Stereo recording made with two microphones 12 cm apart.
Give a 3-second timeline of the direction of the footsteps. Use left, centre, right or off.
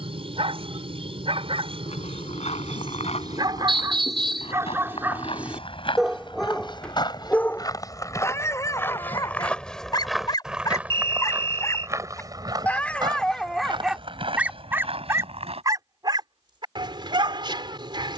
left, left, left, centre, right, right.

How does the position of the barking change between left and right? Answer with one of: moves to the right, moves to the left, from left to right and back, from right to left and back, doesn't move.
from right to left and back.